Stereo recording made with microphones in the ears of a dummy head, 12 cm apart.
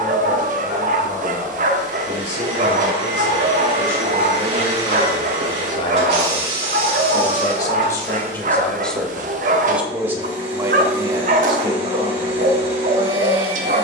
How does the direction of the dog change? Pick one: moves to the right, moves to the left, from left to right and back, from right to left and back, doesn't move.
doesn't move.